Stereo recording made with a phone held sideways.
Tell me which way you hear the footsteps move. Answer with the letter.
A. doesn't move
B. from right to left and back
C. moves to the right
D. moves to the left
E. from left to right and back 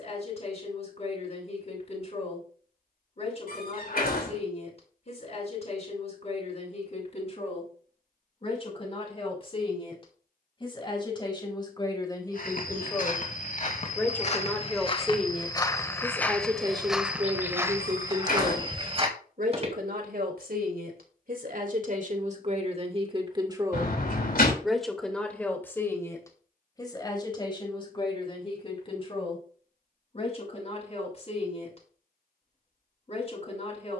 C.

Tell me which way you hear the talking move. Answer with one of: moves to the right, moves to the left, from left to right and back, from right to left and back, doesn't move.
from left to right and back.